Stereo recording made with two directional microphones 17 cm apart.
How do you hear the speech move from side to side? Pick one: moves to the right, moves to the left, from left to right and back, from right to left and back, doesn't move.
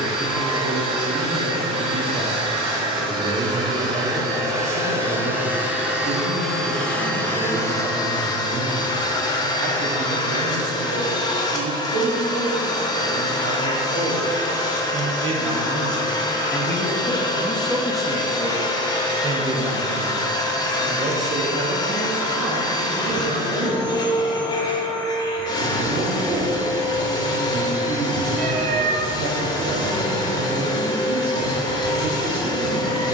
from right to left and back.